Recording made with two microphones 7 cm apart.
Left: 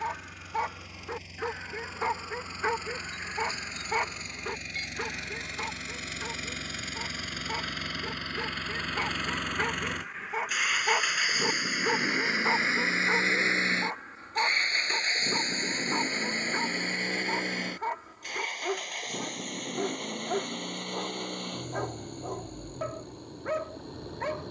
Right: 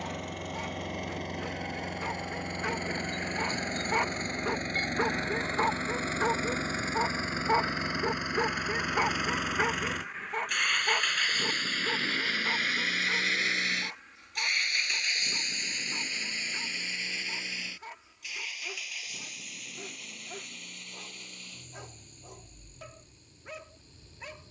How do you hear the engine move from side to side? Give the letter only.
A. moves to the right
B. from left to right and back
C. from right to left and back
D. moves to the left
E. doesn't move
D.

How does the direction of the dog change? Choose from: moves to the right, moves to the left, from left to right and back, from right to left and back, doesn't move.
from left to right and back.